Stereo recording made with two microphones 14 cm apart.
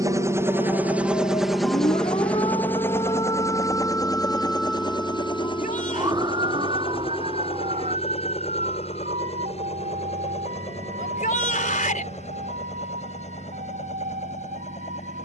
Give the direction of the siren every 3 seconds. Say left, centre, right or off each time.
left, centre, right, right, right.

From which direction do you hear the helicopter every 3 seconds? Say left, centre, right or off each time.
centre, left, left, left, left.